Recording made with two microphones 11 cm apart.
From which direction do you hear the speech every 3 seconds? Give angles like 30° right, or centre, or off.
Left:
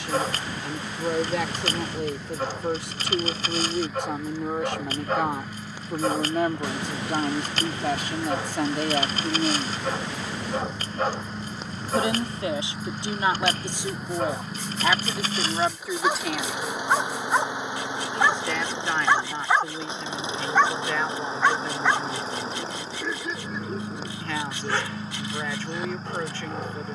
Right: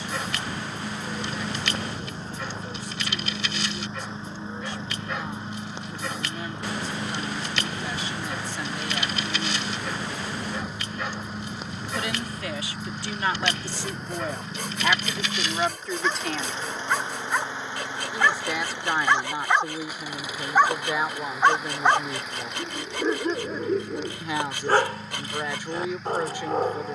80° left, 80° left, 60° left, 50° left, 20° left, centre, 10° right, 20° right, 20° right.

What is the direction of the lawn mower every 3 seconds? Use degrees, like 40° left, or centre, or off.
30° right, 30° right, 20° right, 10° right, centre, 10° left, 20° left, 30° left, 30° left.